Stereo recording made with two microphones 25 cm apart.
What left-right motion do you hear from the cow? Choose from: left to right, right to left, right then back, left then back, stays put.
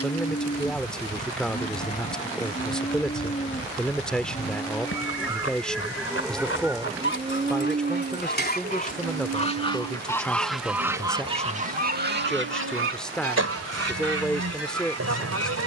left to right.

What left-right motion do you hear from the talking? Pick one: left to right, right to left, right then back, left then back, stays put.
stays put.